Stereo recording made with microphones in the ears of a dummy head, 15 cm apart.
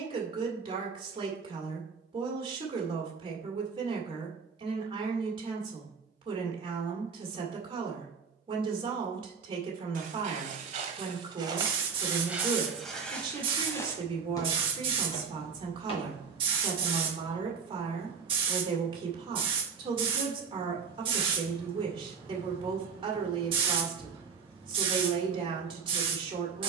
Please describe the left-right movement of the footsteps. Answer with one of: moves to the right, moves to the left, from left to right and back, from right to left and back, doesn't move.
moves to the left.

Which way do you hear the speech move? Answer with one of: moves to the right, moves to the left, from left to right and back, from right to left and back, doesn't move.
doesn't move.